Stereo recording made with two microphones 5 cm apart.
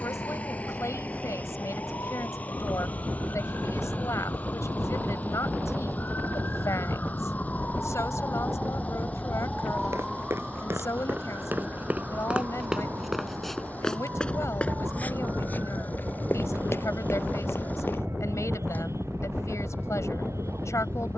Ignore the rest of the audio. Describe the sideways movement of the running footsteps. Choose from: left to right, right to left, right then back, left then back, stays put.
right to left.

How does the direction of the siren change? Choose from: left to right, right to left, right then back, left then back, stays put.
left to right.